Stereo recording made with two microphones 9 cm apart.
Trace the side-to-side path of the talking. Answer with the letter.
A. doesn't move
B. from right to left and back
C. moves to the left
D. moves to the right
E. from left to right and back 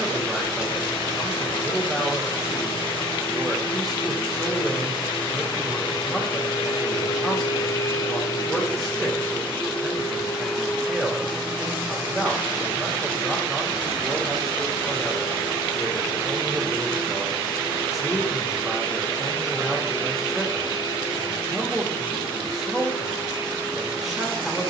A.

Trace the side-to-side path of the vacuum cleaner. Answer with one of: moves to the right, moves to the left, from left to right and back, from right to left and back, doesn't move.
moves to the right.